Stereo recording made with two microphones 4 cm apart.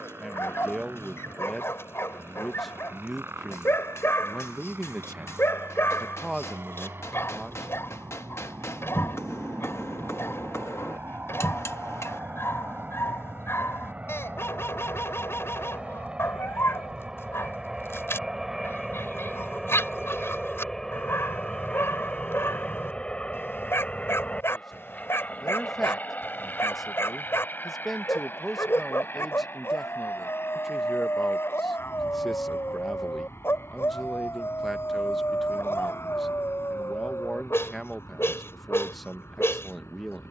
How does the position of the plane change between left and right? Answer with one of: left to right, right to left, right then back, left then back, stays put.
right to left.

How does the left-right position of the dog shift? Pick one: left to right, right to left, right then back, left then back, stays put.
stays put.